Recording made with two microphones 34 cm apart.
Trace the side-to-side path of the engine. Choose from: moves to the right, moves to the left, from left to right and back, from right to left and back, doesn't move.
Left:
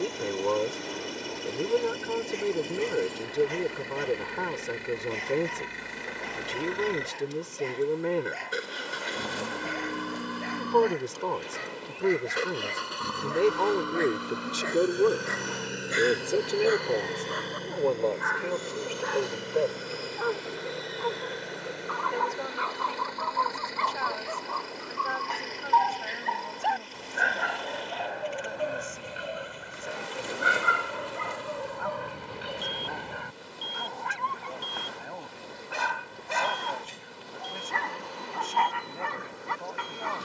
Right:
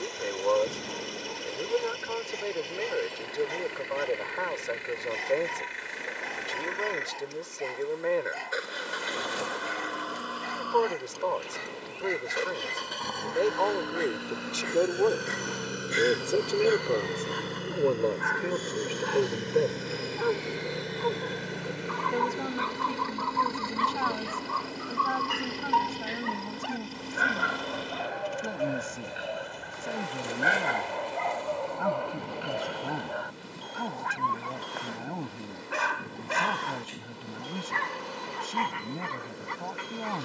moves to the right.